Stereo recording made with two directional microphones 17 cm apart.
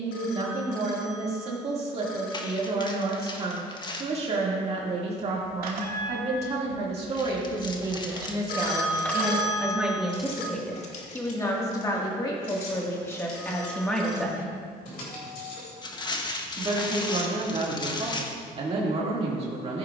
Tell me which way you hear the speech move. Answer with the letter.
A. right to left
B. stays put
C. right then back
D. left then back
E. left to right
D.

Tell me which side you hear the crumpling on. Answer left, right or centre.
left.